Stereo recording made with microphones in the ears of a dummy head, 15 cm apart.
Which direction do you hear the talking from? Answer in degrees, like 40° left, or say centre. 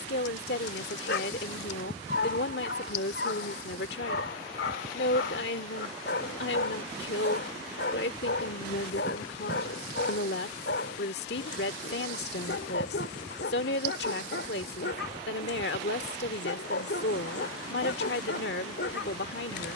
70° left.